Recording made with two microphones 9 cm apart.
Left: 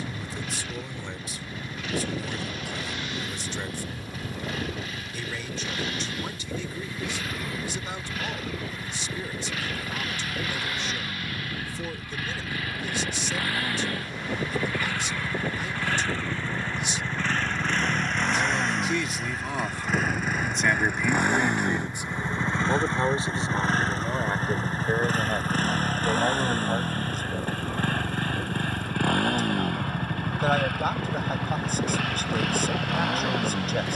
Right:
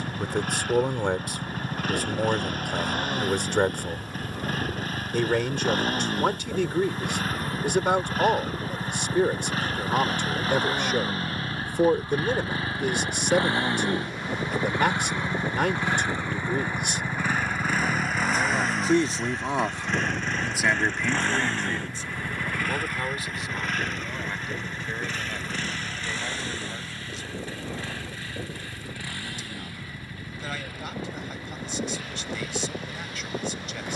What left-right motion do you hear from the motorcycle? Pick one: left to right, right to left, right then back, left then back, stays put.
right to left.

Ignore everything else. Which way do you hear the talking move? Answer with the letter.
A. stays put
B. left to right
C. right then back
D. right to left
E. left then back
D.